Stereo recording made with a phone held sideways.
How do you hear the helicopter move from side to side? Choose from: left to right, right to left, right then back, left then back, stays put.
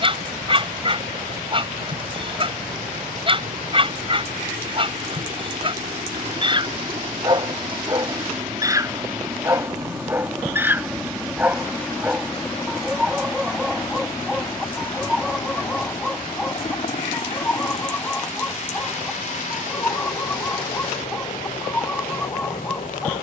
right to left.